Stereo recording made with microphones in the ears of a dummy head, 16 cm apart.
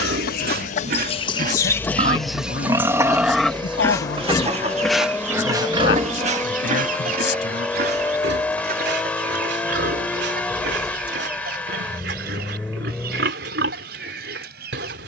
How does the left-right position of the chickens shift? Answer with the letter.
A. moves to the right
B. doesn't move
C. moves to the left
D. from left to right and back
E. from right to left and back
A.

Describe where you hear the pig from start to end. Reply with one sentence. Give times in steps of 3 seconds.
You can hear the pig on the right from 0 s, in the centre from 3 s and on the right from 6 s.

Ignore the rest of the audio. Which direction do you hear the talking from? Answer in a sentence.
You can hear the talking on the left.